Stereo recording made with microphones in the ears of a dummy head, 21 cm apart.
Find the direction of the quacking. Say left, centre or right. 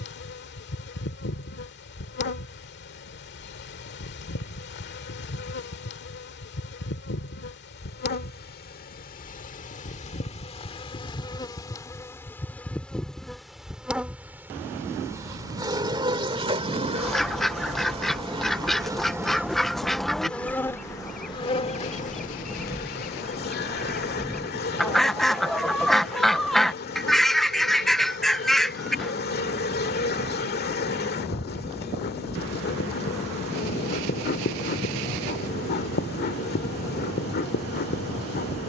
centre.